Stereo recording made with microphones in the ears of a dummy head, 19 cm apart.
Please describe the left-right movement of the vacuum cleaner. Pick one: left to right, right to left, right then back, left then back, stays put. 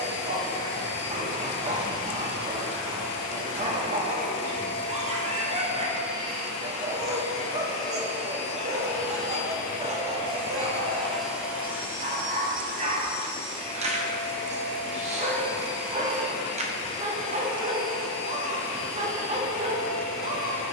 right then back.